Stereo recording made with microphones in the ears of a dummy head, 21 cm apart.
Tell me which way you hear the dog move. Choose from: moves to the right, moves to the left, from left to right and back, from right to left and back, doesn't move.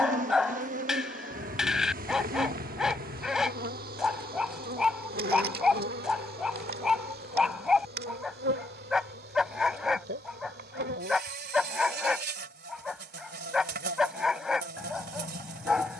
doesn't move.